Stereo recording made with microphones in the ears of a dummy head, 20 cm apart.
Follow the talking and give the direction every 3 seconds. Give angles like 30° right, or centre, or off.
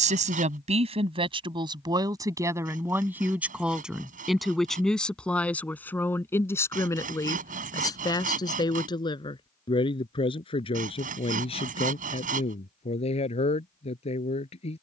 20° right, centre, 10° left, 20° left, 30° left.